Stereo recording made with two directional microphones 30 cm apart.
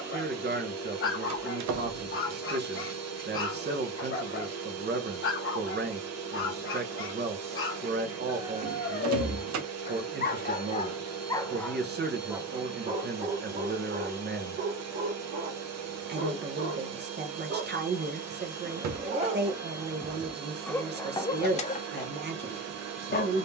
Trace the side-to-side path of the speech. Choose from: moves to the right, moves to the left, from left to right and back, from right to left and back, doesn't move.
doesn't move.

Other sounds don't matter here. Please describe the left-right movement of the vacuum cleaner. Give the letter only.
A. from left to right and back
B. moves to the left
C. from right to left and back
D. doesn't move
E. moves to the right
D.